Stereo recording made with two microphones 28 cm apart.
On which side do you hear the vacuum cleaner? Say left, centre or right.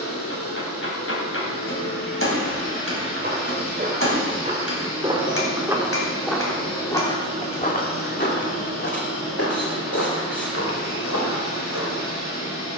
left.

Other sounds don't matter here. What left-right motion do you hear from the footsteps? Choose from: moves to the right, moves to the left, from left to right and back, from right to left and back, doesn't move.
moves to the left.